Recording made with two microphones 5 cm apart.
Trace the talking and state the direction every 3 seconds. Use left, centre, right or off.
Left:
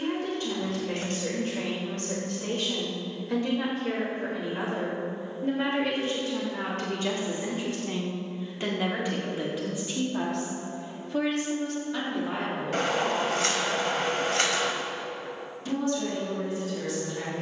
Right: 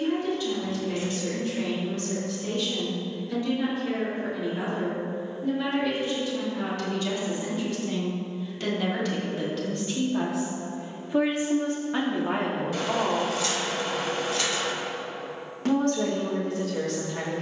left, left, left, centre, right, right.